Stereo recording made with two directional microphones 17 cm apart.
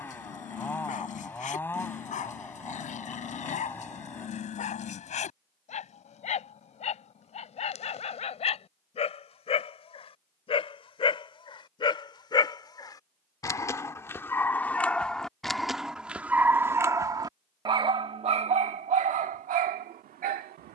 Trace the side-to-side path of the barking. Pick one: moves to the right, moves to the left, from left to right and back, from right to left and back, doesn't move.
moves to the right.